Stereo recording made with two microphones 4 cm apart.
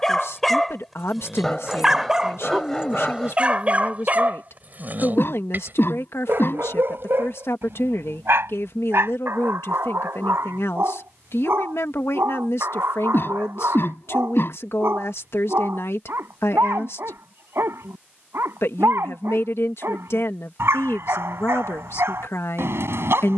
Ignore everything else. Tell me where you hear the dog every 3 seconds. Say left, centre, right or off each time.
centre, right, right, right, right, right, right, right.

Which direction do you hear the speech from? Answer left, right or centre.
left.